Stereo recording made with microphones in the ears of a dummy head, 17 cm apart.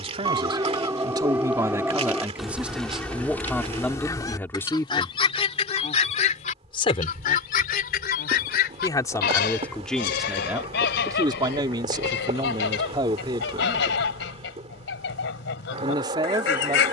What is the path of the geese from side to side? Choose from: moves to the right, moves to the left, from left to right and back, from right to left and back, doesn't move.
moves to the left.